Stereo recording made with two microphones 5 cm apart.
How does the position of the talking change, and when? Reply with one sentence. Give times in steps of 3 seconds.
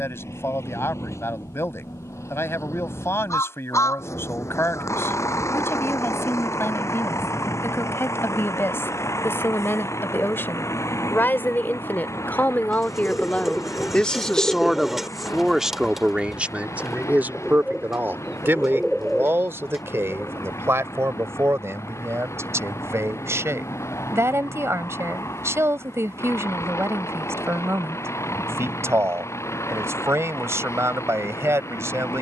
You can hear the talking on the left from 0 s and on the right from 15 s.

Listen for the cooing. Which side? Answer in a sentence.
You can hear the cooing in the centre.